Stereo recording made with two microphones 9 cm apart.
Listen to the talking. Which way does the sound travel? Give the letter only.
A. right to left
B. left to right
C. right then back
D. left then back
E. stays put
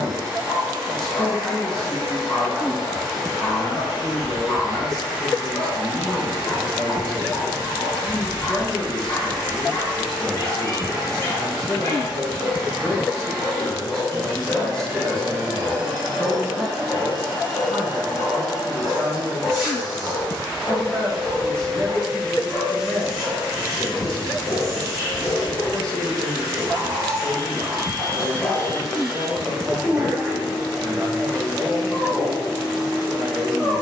E.